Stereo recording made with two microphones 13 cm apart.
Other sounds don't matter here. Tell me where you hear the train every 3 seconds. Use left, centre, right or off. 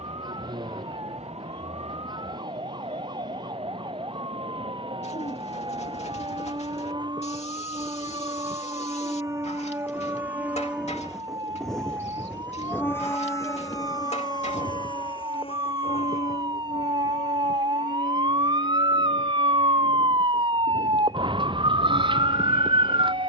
right, right, right, centre, left, left, left, left.